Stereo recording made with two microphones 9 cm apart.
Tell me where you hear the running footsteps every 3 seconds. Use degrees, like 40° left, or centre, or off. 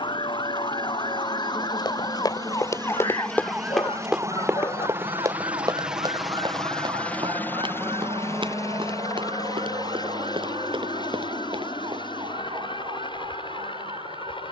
50° left, 20° right, 60° right, 70° right, off.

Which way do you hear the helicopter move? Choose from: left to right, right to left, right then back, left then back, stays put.
right to left.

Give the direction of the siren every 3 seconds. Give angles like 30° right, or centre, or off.
50° left, 40° right, 70° right, 80° right, 80° right.